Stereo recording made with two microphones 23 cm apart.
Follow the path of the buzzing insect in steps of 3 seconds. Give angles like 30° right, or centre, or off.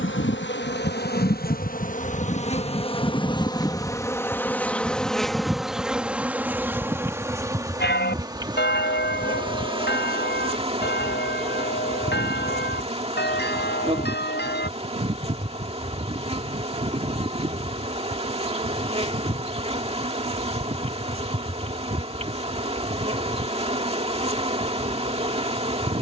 40° left, 10° left, 10° right, 20° right, 30° right, 30° right, 30° right, 30° right, 30° right.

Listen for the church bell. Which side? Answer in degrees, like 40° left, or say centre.
50° left.